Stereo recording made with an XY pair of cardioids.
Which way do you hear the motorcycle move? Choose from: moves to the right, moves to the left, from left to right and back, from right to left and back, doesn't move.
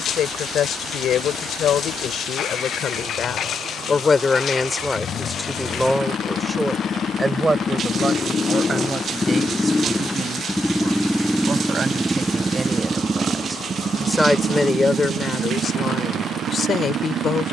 moves to the right.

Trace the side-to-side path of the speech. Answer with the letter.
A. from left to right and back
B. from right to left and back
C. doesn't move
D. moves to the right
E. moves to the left
A.